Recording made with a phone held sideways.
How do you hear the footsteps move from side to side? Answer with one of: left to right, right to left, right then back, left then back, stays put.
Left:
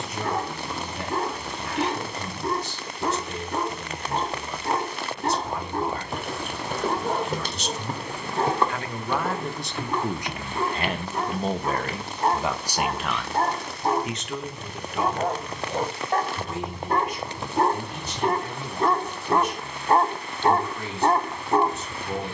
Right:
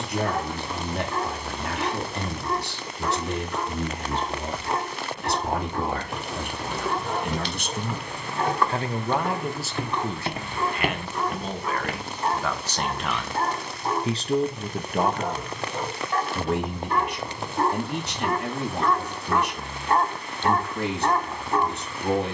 left to right.